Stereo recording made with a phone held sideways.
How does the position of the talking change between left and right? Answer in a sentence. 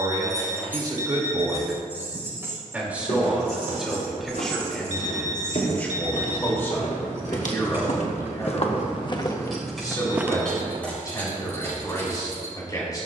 In this clip you hear the talking move to the left.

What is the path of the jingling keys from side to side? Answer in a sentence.
You can hear the jingling keys move from left to right and back again.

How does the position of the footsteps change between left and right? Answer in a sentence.
You can hear the footsteps travel towards the right.